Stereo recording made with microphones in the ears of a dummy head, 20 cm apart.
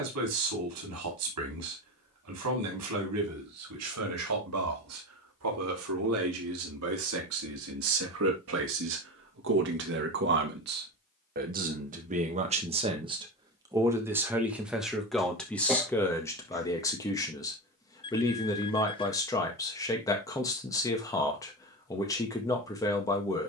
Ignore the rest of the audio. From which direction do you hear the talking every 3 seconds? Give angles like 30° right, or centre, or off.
80° right, 80° right, 70° right, 50° right, 20° right, 10° left, 20° left, 20° left.